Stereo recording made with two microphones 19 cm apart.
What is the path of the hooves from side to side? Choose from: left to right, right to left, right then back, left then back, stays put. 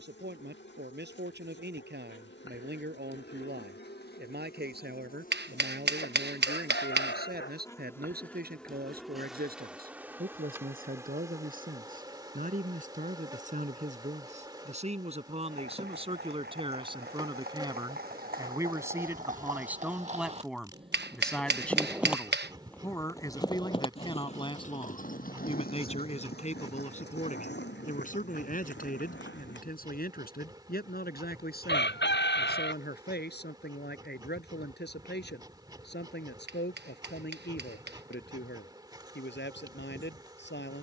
right to left.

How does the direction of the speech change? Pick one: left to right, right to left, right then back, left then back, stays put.
right to left.